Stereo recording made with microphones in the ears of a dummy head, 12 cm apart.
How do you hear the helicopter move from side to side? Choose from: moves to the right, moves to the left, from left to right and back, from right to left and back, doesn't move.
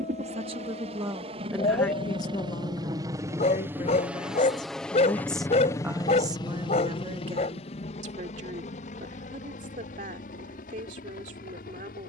moves to the left.